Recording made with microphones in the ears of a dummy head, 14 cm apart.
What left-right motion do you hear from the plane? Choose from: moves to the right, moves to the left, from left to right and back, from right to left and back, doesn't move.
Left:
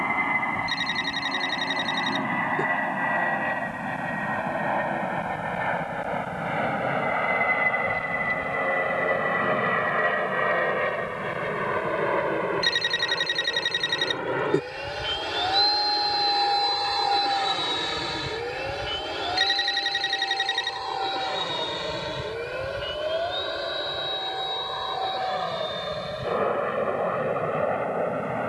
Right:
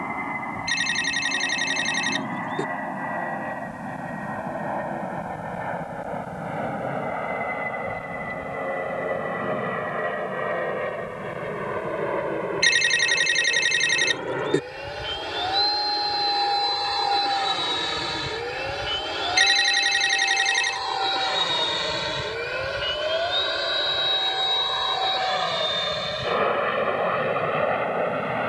moves to the right.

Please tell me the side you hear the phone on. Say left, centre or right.
right.